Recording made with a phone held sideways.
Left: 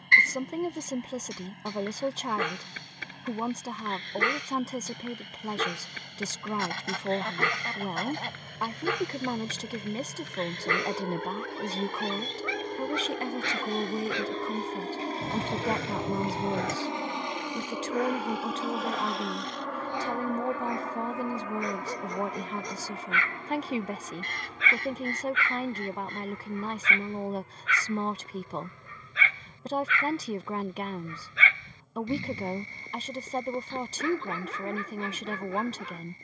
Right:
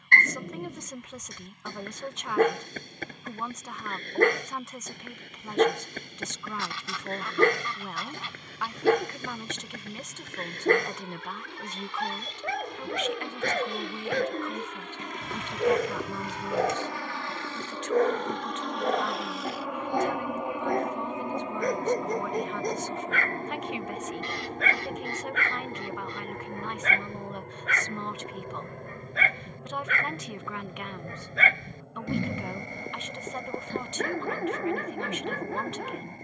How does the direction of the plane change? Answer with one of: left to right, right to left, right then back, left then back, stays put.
left to right.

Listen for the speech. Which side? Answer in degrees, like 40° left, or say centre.
40° left.